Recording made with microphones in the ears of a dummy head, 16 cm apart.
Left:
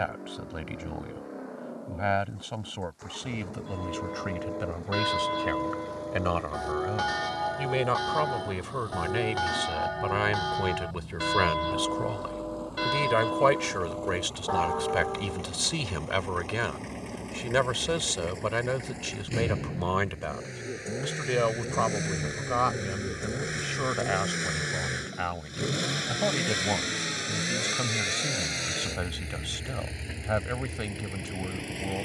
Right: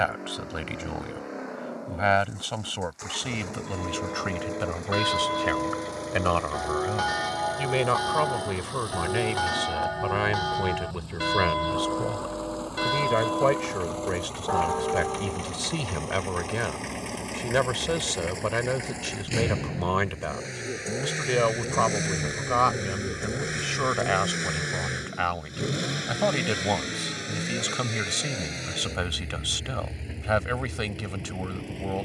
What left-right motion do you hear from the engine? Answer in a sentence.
You can hear the engine move to the left.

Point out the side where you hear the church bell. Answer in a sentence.
In this clip you hear the church bell in the centre.